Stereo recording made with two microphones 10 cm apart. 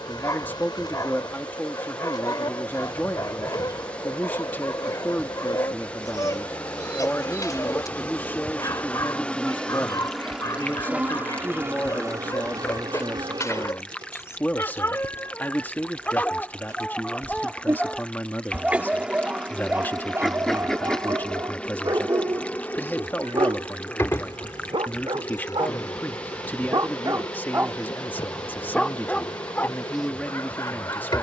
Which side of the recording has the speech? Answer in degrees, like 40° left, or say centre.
20° left.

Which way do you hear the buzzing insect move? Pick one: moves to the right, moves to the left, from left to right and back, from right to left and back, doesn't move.
from left to right and back.